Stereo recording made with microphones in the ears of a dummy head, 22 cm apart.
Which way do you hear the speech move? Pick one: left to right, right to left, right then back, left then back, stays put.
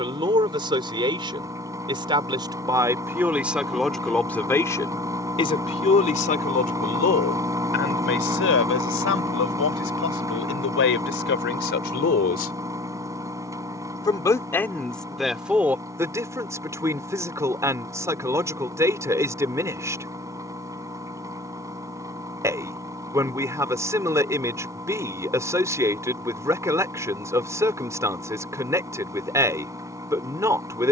left then back.